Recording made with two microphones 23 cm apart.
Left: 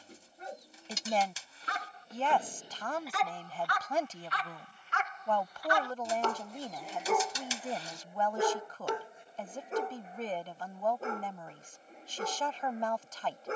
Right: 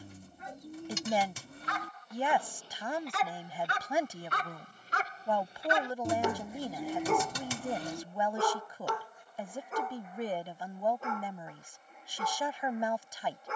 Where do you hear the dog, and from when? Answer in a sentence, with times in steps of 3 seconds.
In this clip you hear the dog on the left from 0 s, on the right from 3 s, in the centre from 6 s and on the left from 9 s.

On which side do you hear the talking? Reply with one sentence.
You can hear the talking in the centre.